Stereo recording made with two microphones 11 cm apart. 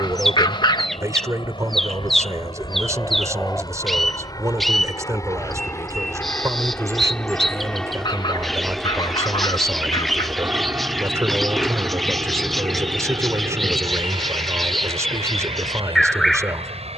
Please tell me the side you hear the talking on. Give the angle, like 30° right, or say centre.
30° right.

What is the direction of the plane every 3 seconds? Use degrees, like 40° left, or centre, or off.
50° left, 30° left, 10° left, 20° right, 40° right, 50° right.